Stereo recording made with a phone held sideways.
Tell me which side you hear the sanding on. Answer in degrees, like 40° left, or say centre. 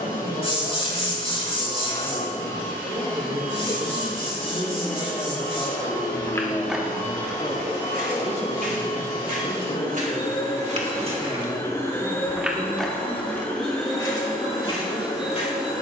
40° left.